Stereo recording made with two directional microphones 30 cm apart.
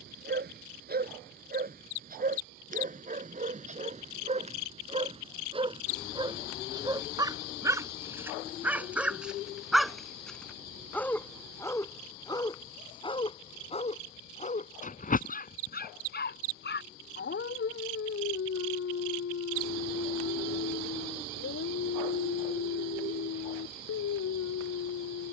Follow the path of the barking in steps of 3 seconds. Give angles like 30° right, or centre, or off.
30° right, 20° right, 10° right, centre, 20° left, 30° left, 50° left, 60° left, 60° left.